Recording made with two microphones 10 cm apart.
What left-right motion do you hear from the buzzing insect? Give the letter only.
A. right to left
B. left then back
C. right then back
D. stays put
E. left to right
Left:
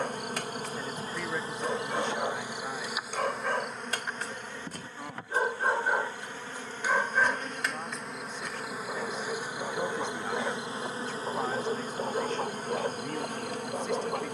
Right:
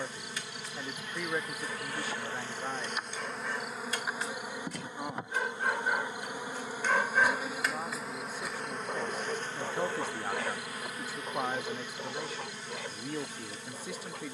C.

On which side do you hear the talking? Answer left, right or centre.
centre.